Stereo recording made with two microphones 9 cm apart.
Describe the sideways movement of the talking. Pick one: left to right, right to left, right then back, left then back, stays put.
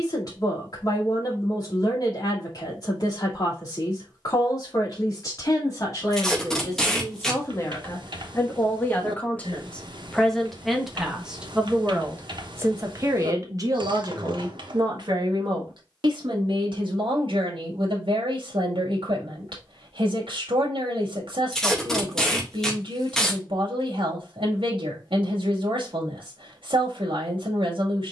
left to right.